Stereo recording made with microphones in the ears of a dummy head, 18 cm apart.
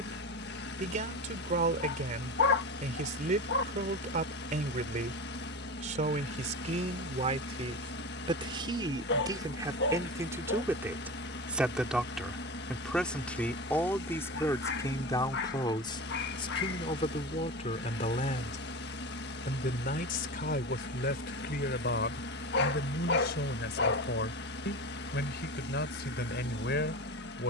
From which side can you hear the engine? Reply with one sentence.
In this clip you hear the engine on the left.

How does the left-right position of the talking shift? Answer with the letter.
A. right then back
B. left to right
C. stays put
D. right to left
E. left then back
D.